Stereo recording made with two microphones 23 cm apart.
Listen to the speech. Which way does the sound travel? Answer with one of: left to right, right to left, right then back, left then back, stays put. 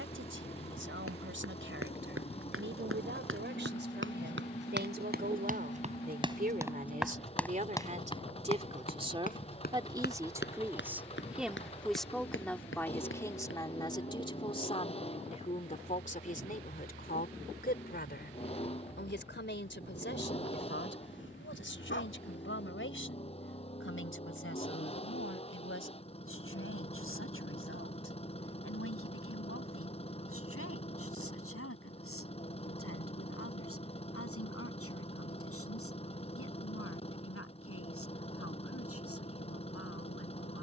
right to left.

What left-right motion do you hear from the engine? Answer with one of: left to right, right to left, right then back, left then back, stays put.
stays put.